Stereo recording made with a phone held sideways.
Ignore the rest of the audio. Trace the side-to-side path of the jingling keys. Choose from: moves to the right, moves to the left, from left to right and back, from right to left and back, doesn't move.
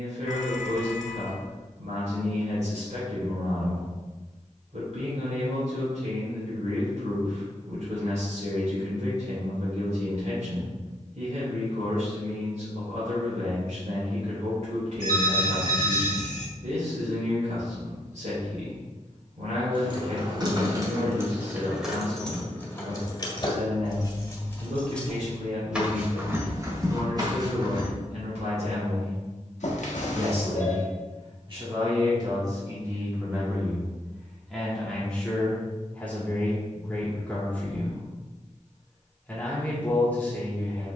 from right to left and back.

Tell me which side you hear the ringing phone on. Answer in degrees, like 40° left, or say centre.
70° left.